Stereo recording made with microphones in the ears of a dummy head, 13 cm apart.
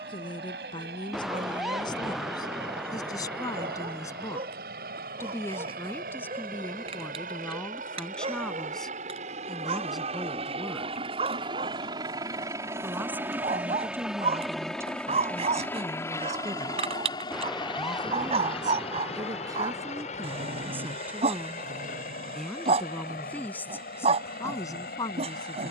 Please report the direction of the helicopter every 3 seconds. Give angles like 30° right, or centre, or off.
70° right, 70° right, 60° right, 40° right, 10° right, 20° left, 40° left, 50° left, 60° left.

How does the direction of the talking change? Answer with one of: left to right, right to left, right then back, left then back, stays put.
right then back.